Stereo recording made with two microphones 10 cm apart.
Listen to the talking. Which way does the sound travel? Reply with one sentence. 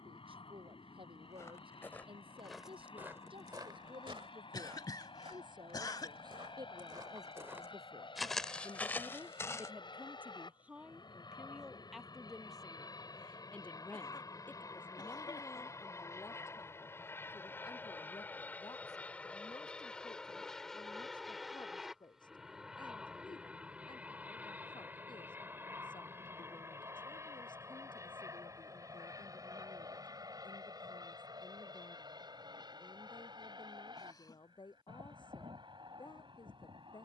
In this clip you hear the talking move from right to left.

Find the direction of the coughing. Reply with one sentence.
In this clip you hear the coughing on the left.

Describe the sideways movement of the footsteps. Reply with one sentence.
In this clip you hear the footsteps go right and come back.